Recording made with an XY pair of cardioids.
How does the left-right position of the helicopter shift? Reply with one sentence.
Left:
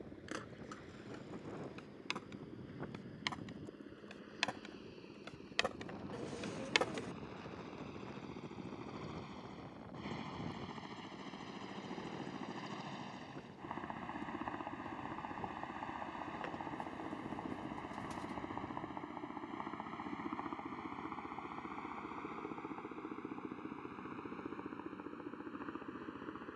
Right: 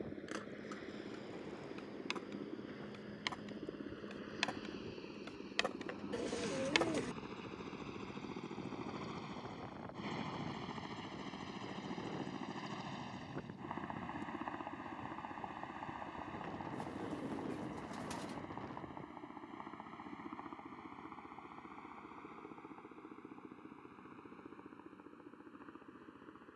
In this clip you hear the helicopter move from right to left.